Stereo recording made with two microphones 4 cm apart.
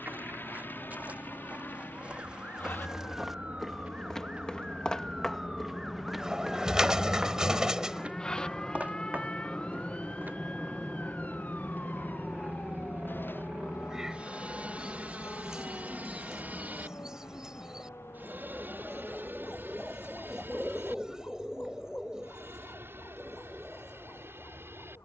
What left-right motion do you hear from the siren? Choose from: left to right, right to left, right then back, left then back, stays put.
right to left.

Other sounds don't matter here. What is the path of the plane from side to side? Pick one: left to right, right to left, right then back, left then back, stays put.
left to right.